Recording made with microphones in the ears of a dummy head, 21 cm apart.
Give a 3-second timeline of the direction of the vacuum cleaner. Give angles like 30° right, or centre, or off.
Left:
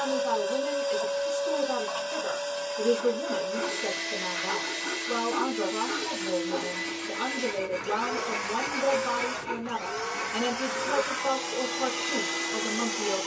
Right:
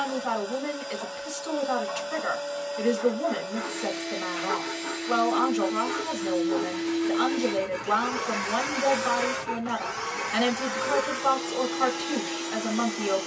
50° left, 50° left, 20° left, 10° left, 50° left.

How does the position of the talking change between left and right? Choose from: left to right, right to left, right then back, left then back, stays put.
stays put.